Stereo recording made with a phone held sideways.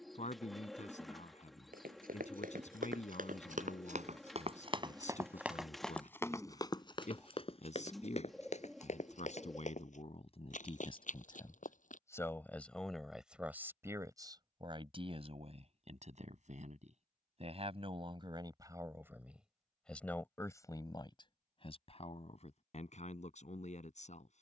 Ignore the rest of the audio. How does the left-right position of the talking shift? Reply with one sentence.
You can hear the talking go right and come back.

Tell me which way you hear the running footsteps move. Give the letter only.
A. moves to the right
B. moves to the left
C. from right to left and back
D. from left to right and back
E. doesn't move
B.